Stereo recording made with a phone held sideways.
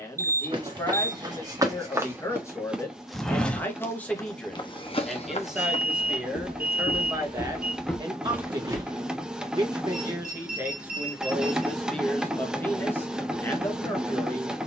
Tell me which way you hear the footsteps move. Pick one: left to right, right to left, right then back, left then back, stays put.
left then back.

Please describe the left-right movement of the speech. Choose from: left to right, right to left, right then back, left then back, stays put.
right then back.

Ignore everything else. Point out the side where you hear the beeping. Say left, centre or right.
right.